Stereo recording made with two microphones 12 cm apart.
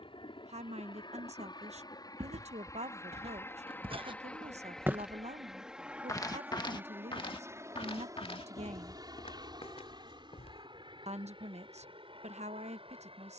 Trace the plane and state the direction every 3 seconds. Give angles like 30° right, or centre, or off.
40° left, 10° left, 20° right, 40° right, 50° right.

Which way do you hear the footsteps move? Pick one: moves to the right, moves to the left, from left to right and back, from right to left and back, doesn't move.
moves to the left.